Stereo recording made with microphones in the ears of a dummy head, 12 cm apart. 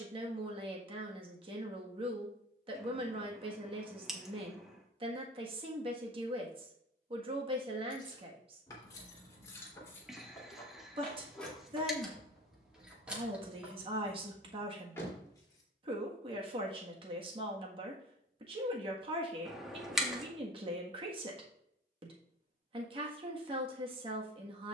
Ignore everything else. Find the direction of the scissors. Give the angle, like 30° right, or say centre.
centre.